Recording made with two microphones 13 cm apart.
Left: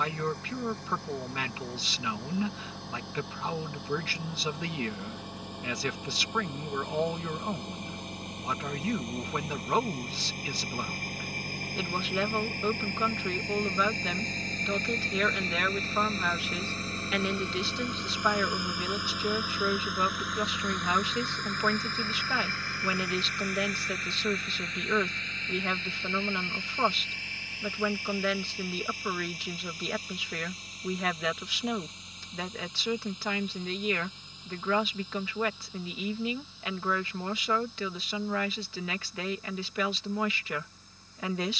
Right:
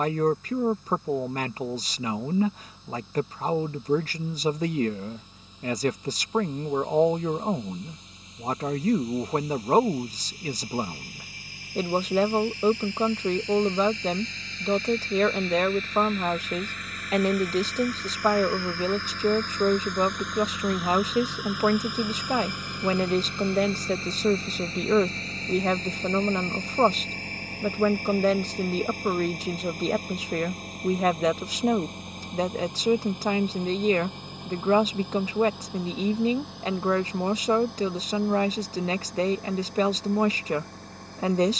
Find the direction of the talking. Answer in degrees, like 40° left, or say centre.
40° right.